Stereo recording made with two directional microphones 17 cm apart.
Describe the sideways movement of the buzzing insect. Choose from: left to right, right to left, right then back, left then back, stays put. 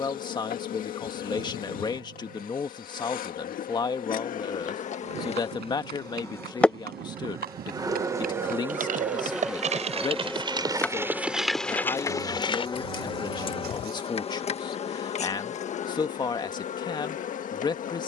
right then back.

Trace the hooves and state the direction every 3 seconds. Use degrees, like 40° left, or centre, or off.
off, 70° right, 60° right, 20° right, 40° left, off.